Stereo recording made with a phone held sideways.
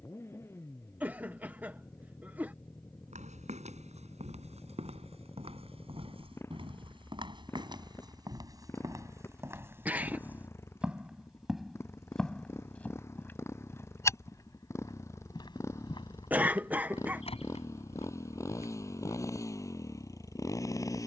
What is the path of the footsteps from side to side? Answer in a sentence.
In this clip you hear the footsteps move to the left.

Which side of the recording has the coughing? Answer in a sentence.
You can hear the coughing in the centre.